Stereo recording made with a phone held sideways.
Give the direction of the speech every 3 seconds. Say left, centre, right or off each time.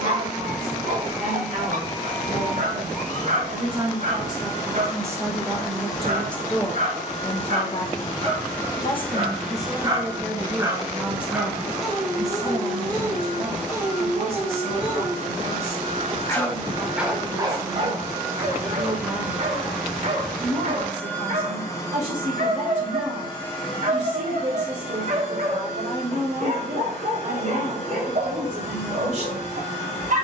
right, right, left, centre, right, right, right, right, right, right.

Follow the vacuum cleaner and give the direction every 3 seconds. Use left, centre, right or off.
left, left, left, right, right, right, centre, left, left, left.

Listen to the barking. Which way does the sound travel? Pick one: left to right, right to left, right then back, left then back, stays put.
left then back.